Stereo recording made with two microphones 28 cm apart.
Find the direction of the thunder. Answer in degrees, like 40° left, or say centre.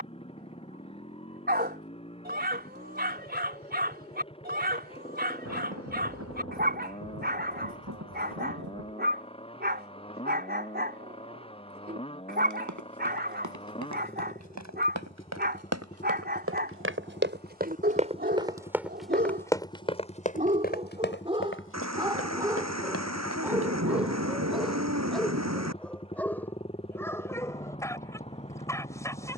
60° right.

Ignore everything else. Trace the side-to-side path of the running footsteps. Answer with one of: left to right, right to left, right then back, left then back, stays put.
right to left.